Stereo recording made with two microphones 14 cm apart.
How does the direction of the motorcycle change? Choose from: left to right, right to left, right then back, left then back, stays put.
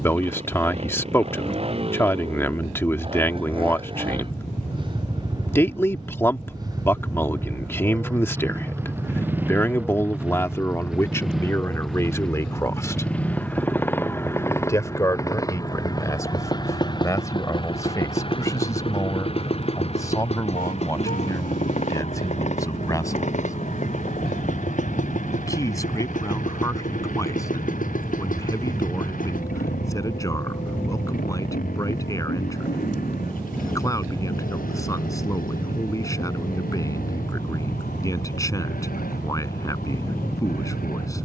right to left.